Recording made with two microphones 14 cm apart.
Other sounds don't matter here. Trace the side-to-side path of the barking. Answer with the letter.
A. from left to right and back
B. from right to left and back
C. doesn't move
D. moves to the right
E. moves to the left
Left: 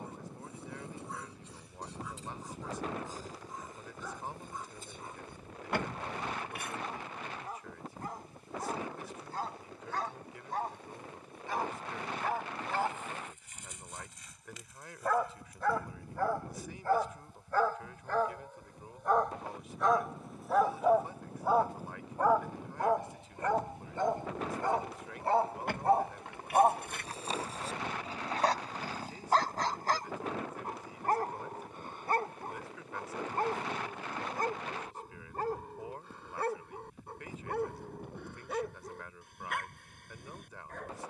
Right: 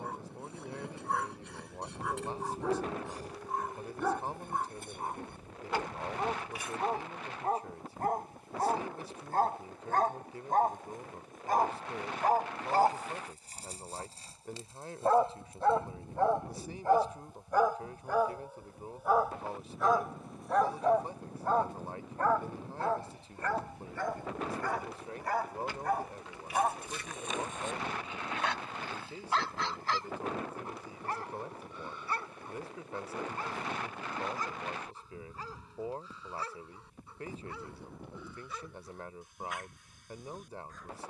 E.